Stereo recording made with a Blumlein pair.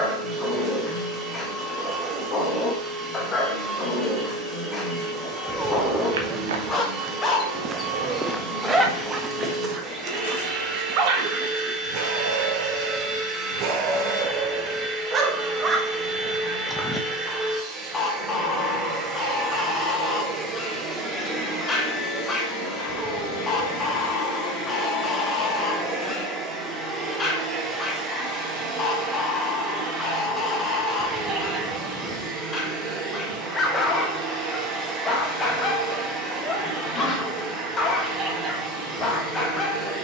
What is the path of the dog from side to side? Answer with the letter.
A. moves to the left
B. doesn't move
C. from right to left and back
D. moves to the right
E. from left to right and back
E.